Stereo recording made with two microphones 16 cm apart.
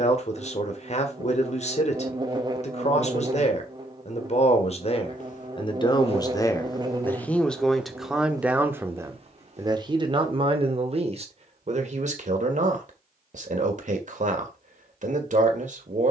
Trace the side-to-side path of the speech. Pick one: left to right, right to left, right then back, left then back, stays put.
left to right.